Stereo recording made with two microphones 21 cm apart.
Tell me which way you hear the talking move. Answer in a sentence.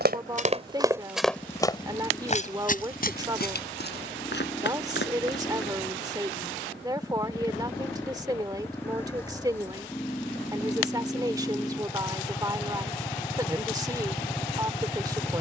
In this clip you hear the talking stay put.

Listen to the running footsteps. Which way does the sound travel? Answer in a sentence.
In this clip you hear the running footsteps move to the left.